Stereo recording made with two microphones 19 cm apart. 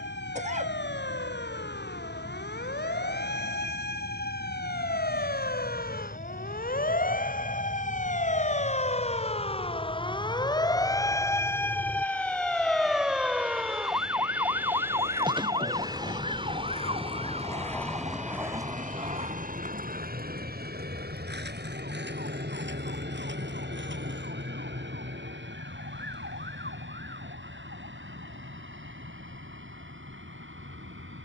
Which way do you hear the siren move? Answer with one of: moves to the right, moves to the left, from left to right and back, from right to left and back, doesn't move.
moves to the right.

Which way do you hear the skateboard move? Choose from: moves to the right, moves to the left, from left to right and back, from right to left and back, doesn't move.
moves to the right.